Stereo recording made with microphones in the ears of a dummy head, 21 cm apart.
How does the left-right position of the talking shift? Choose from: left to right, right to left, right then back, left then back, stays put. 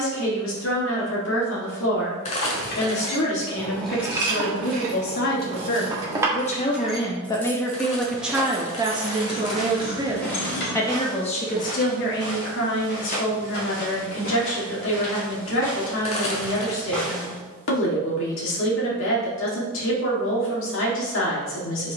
right then back.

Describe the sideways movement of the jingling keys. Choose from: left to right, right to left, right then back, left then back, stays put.
right then back.